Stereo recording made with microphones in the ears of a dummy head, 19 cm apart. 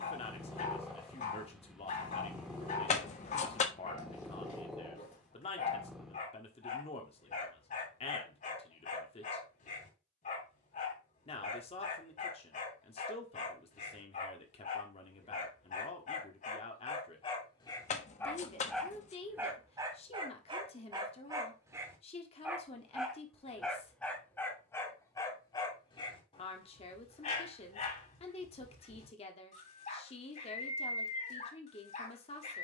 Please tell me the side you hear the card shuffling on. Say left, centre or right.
left.